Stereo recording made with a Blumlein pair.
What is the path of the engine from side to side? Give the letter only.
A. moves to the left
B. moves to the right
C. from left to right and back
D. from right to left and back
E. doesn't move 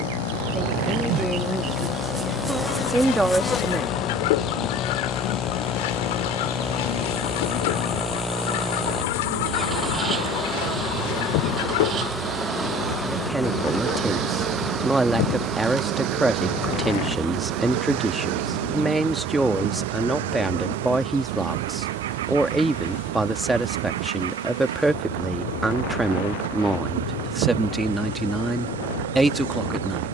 B.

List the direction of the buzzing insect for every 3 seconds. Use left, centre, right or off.
right, left, left, left, centre, right, right, right, right, right.